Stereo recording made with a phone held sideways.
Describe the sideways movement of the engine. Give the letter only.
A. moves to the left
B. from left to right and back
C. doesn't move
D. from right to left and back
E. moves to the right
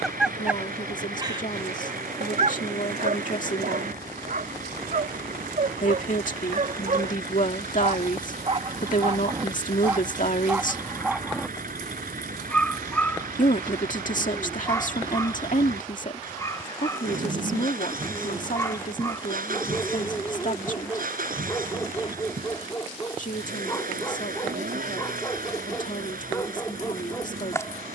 C.